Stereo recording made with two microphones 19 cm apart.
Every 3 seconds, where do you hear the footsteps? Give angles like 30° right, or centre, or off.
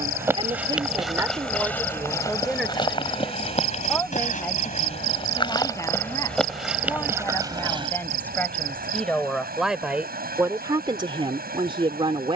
10° left, 30° left, 10° right, off.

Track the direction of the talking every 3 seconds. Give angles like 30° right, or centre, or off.
10° right, 10° left, 10° left, 20° right.